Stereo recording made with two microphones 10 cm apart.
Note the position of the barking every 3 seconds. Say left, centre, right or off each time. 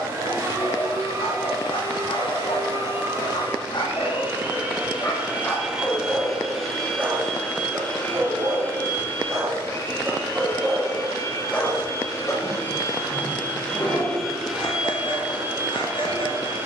left, left, right, centre, left, left.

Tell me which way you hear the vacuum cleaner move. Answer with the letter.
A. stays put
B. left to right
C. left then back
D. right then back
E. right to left
C.